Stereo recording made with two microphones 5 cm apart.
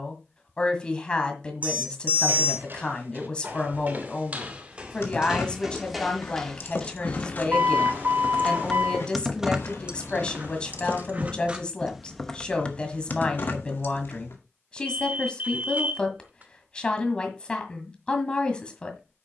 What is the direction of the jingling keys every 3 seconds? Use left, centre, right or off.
off, left, left, right, left, off, off.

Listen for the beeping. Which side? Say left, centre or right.
right.